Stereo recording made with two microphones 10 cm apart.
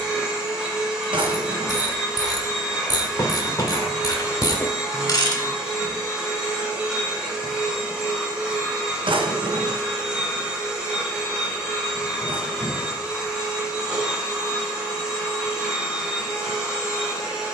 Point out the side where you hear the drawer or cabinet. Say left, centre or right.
right.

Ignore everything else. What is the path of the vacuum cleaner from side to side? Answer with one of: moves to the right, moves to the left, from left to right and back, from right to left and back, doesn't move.
doesn't move.